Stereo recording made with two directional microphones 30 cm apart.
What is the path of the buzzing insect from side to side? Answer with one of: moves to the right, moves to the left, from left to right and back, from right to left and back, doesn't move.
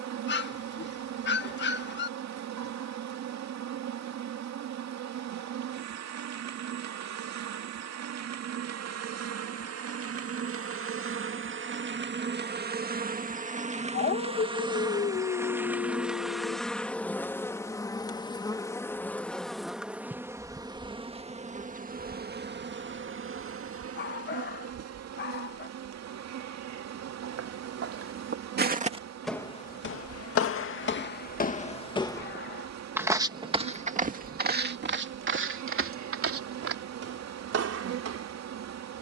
from right to left and back.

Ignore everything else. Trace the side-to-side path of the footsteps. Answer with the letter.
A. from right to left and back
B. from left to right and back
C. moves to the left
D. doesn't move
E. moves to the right
A.